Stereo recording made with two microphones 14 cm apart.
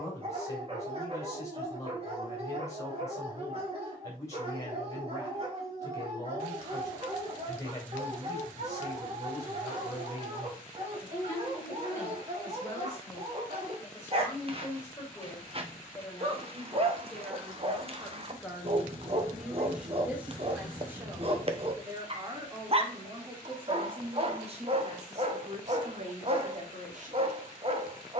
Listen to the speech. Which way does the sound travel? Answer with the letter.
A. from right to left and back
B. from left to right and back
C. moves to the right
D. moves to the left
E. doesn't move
C.